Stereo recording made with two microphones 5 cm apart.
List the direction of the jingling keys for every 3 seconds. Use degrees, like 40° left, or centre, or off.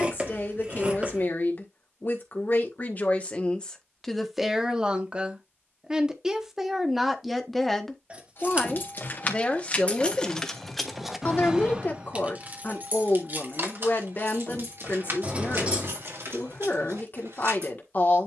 off, off, 50° left, 10° left, 50° right, 70° right.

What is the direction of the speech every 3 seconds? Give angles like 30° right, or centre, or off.
40° left, centre, centre, 30° left, 40° left, 40° left.